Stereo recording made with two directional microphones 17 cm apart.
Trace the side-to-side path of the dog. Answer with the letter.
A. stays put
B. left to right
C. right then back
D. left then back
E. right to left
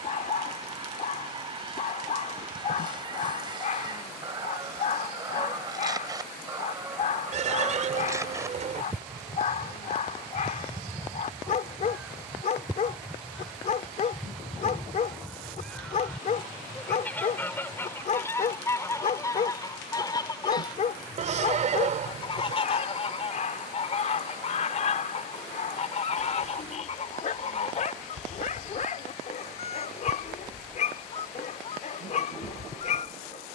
A.